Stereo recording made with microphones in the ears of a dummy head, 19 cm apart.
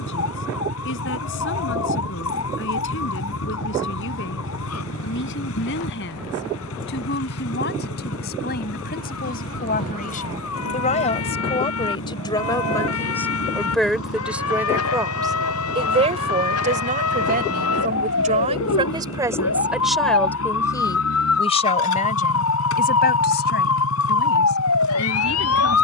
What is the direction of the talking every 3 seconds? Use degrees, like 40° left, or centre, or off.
60° left, 60° left, 50° left, 40° left, 10° left, 30° right, 10° right, 40° left, 60° left.